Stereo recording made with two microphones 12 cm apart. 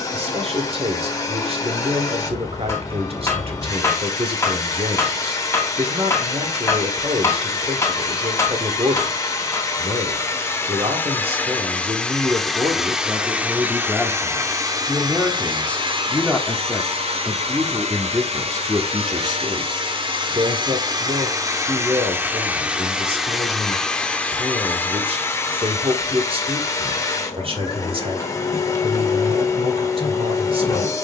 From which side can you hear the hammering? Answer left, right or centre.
left.